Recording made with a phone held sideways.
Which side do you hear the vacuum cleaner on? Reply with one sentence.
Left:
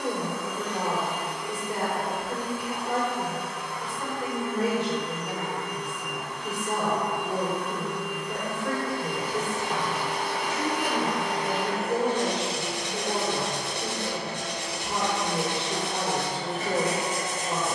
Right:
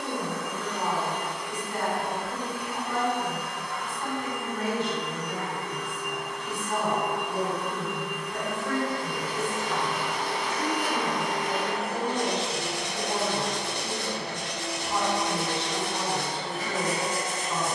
In this clip you hear the vacuum cleaner on the left.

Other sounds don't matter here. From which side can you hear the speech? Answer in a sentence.
You can hear the speech on the left.